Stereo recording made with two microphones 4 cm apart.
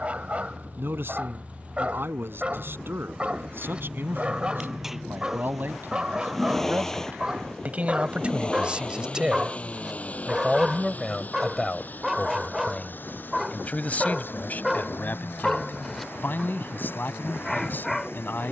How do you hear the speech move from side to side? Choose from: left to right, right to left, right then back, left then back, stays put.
right to left.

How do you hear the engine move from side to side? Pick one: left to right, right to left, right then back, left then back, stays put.
right to left.